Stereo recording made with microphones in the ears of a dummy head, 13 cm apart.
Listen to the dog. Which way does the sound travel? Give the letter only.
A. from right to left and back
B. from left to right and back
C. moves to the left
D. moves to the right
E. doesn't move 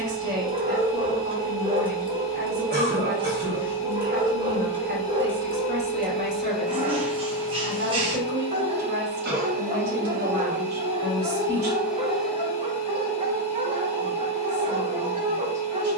E.